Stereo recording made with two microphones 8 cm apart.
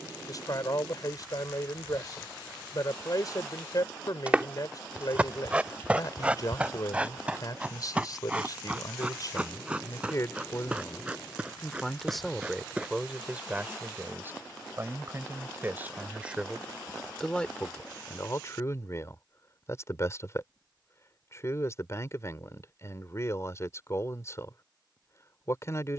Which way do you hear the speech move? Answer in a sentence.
In this clip you hear the speech move from left to right and back again.